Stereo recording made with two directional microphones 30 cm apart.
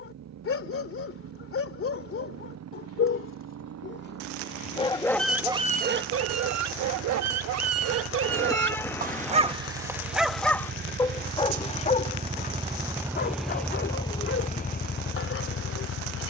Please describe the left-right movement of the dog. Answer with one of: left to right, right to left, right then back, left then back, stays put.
right then back.